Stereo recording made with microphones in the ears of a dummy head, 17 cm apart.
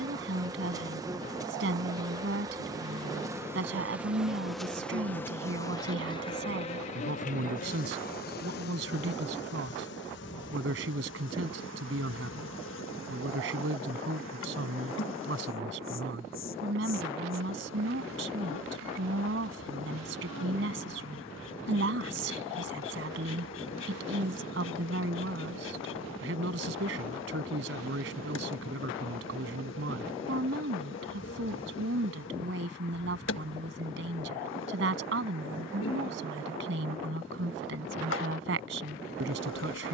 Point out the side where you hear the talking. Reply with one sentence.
In this clip you hear the talking on the right.